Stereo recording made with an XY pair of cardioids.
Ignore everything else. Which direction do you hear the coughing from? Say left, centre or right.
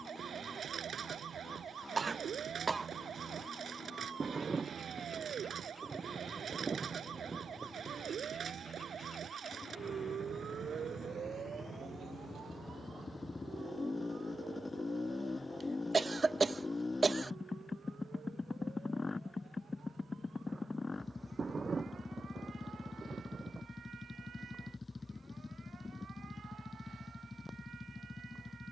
right.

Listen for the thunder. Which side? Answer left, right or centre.
right.